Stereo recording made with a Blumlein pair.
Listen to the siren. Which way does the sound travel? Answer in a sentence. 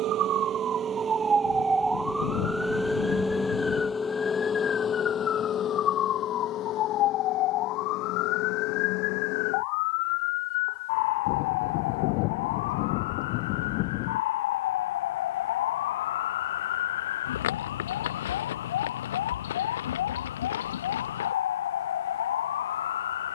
You can hear the siren move to the left.